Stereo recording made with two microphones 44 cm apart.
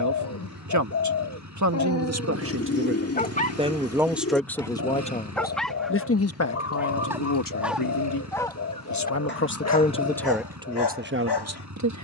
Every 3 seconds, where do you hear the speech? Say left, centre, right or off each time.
right, centre, left, centre.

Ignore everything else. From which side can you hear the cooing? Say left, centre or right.
left.